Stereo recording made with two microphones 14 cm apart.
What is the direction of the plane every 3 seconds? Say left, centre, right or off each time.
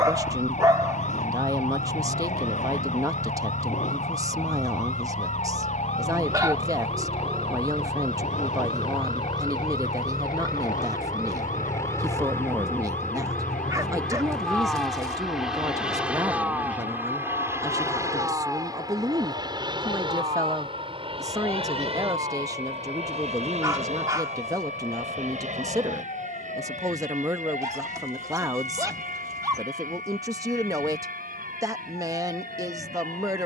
left, left, left, left, centre, centre, right, right, right, right, right.